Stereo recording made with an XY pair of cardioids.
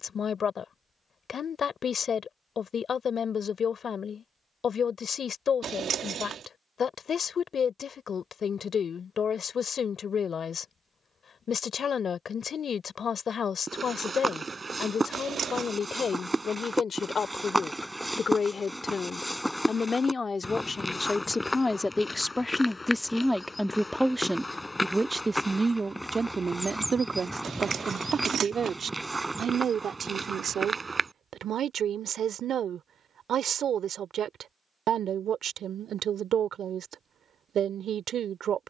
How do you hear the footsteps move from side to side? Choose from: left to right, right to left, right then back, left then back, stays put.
left then back.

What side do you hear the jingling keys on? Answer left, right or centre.
right.